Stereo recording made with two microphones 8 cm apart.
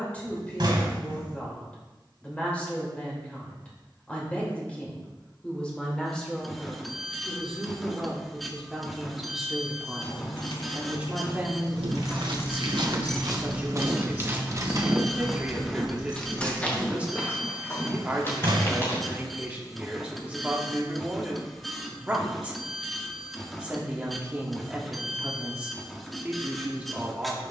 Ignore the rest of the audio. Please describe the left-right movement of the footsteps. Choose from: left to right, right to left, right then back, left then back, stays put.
right to left.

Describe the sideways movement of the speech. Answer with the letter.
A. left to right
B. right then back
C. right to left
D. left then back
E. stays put
A.